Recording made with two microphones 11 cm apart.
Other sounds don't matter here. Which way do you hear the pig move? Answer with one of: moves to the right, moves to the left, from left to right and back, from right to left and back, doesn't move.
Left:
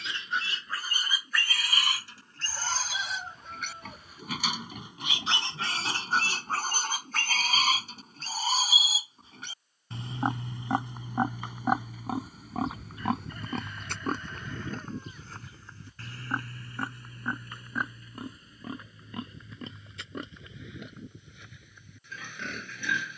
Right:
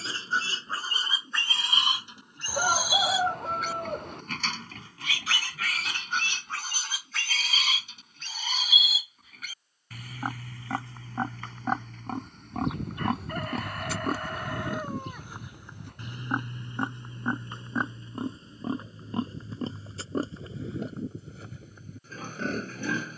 from right to left and back.